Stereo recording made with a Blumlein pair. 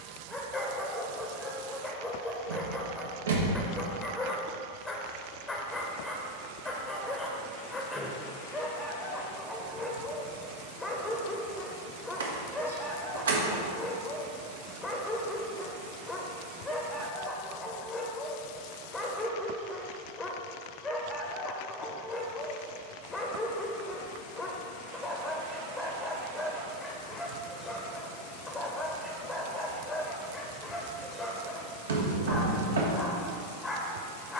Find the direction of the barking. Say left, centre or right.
centre.